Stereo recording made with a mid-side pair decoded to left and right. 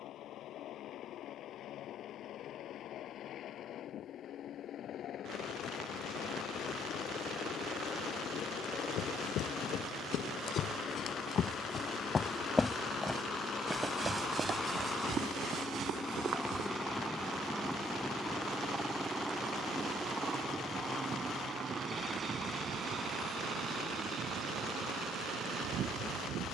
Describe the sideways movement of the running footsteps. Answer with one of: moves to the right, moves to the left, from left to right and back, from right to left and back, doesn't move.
moves to the right.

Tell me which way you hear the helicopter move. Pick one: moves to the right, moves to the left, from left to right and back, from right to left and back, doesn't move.
moves to the right.